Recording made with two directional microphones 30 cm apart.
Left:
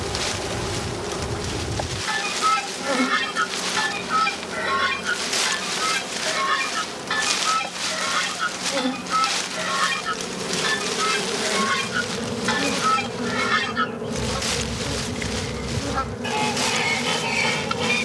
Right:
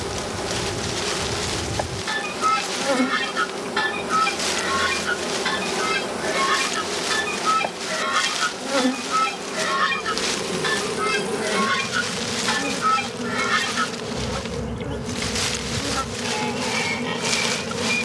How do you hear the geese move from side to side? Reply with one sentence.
In this clip you hear the geese go right and come back.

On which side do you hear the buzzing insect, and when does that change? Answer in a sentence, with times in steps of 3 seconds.
In this clip you hear the buzzing insect in the centre from 0 s, on the right from 3 s and in the centre from 12 s.